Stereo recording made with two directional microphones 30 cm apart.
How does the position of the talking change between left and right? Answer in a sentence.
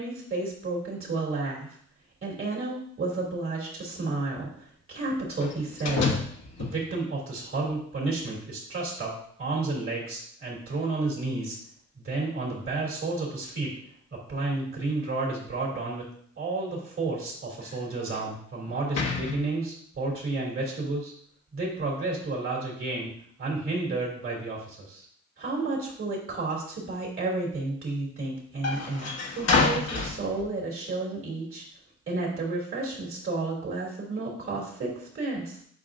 In this clip you hear the talking stay put.